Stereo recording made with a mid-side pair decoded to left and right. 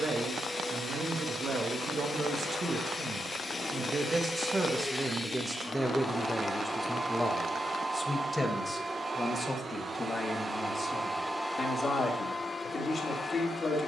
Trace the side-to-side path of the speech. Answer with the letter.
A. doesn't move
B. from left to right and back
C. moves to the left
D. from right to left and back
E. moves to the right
C.